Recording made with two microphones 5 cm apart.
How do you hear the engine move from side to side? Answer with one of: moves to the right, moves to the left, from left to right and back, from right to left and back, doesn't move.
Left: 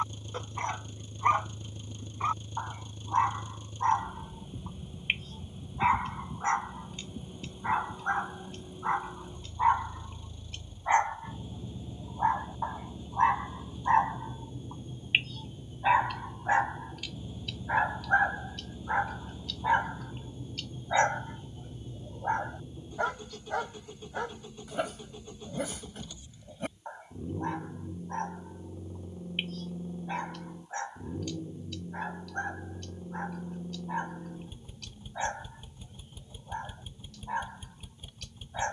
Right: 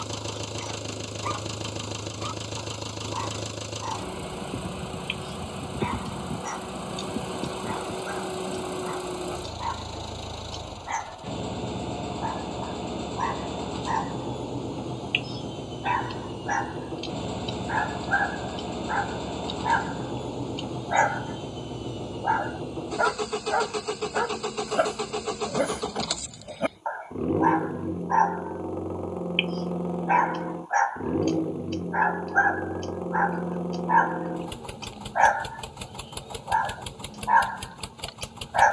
doesn't move.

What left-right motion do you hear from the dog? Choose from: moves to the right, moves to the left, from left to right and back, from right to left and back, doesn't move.
moves to the right.